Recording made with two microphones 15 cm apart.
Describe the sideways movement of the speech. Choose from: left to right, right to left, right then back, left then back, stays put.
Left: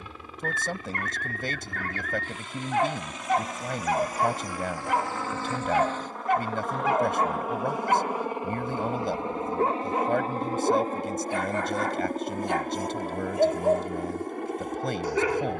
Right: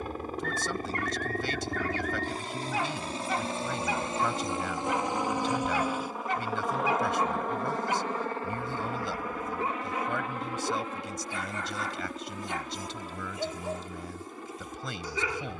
stays put.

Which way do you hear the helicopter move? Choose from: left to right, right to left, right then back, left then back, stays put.
right to left.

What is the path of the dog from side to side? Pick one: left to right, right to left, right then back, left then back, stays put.
stays put.